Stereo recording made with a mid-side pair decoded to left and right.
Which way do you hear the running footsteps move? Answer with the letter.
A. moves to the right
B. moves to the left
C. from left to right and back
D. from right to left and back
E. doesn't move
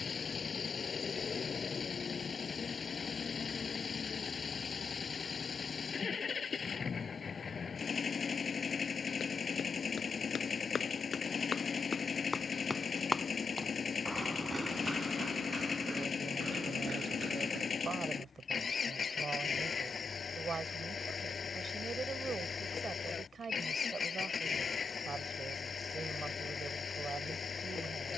A.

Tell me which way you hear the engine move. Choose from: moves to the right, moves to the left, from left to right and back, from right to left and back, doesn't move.
doesn't move.